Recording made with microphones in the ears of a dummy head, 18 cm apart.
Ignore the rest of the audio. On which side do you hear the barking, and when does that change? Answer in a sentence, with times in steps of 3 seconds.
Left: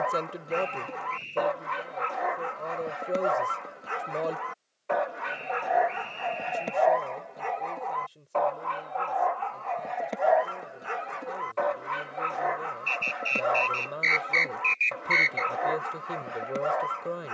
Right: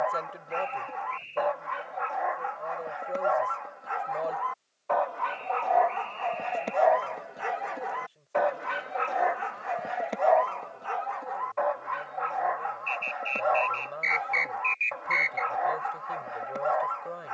In this clip you hear the barking on the left from 0 s, in the centre from 6 s and on the left from 12 s.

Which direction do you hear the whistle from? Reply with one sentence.
In this clip you hear the whistle on the left.